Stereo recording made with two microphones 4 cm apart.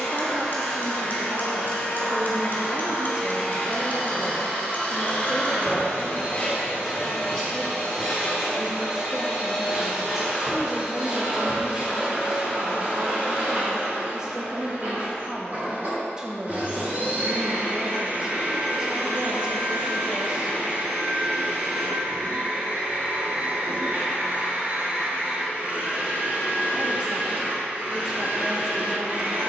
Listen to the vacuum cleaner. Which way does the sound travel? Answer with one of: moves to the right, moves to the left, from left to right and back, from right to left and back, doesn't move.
moves to the right.